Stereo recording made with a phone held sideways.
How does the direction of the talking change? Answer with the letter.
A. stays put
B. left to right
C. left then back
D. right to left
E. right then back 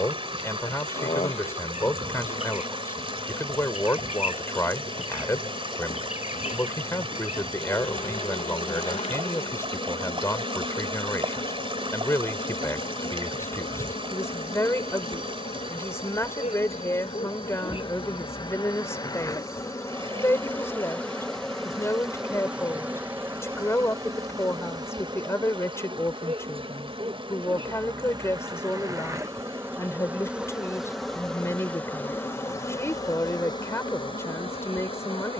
A.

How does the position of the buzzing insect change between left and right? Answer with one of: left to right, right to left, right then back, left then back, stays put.
right then back.